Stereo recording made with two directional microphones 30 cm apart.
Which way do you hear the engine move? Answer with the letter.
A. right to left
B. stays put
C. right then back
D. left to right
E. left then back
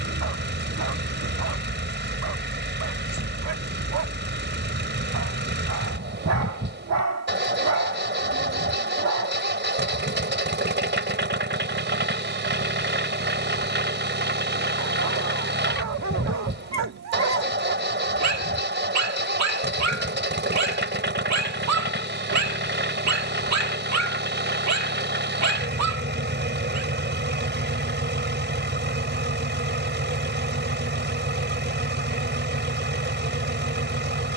B.